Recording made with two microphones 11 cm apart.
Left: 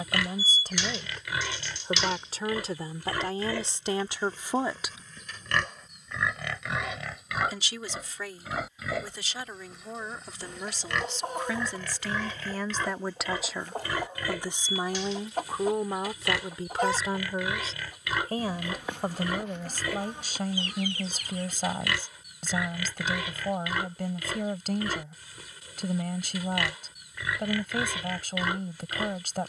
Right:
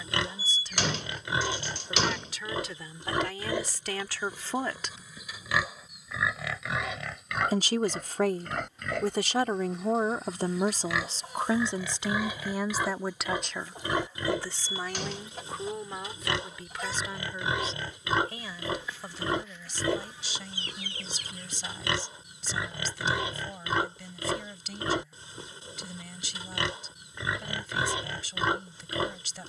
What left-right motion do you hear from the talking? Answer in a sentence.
In this clip you hear the talking go right and come back.